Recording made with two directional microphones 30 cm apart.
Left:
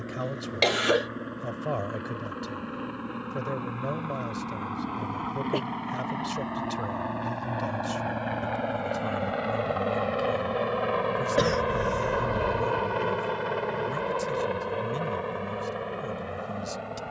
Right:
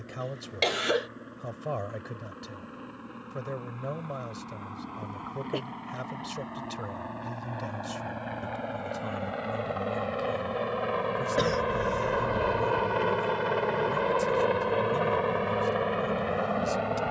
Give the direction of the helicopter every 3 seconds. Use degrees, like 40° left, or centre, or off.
60° left, 50° left, 40° left, 20° left, 20° right, 50° right.